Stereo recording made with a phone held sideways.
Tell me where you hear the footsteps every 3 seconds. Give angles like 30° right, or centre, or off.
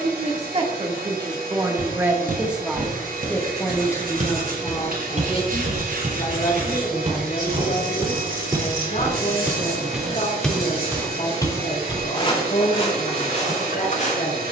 70° right, 60° right, 40° right, centre, 40° left.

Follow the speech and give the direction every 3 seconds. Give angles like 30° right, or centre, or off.
20° right, 30° left, 50° left, 60° left, 70° left.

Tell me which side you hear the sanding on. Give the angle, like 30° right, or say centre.
80° right.